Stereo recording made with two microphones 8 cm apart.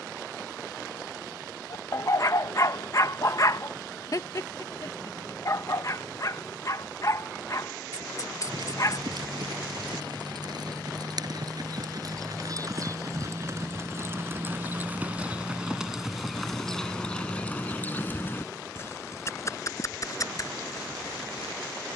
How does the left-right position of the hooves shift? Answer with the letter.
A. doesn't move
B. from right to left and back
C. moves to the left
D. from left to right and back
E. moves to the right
C.